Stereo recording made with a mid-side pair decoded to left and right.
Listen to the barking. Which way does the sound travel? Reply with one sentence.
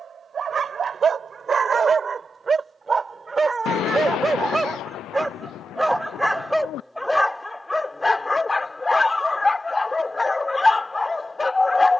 In this clip you hear the barking move from right to left.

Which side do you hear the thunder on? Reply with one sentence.
You can hear the thunder on the left.